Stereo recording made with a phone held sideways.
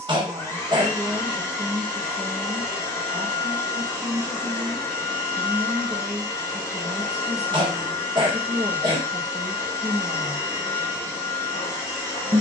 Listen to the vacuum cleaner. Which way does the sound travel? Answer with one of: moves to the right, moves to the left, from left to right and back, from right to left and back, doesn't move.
doesn't move.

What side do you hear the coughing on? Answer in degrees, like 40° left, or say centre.
30° right.